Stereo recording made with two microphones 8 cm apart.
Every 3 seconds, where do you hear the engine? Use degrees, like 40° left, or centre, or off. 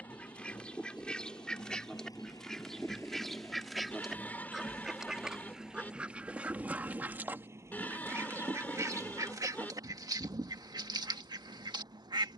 50° left, 10° left, 30° right, 50° right.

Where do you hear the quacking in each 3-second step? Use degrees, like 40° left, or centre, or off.
10° left, centre, 30° right, 60° right.